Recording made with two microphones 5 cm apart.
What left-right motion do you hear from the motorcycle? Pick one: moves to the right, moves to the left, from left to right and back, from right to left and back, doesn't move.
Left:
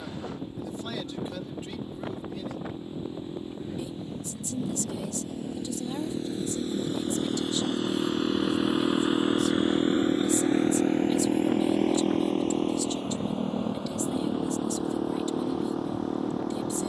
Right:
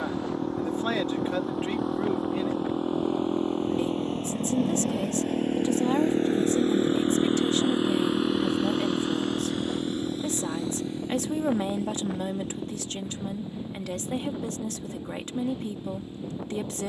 moves to the left.